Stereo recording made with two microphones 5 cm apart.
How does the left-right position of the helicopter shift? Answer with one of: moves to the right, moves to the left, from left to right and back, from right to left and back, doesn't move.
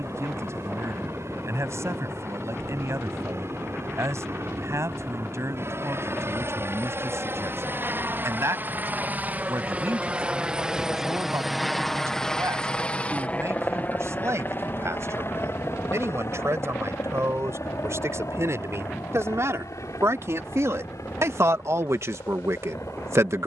moves to the left.